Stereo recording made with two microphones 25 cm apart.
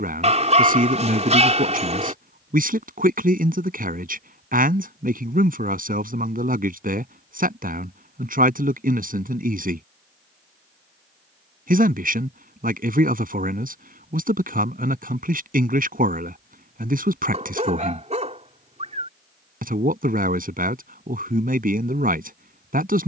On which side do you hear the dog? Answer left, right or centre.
right.